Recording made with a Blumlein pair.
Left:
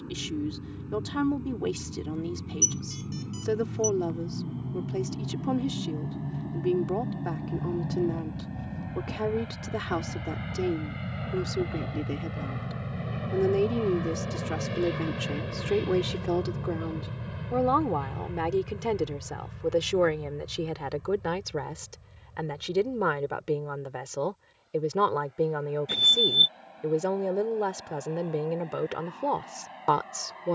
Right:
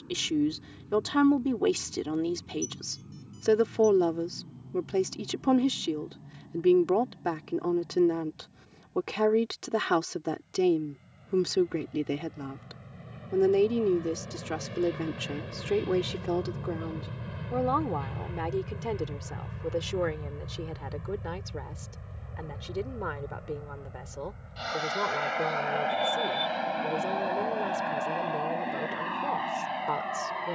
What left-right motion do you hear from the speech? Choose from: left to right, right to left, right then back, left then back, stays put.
right to left.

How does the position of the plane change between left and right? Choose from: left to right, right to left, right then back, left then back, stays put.
left to right.